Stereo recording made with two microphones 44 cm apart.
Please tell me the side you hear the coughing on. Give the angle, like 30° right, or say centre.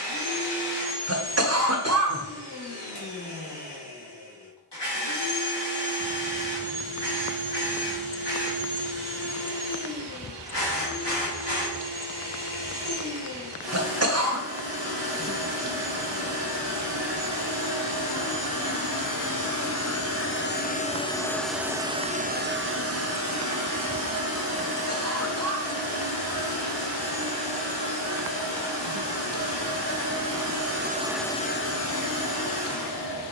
30° right.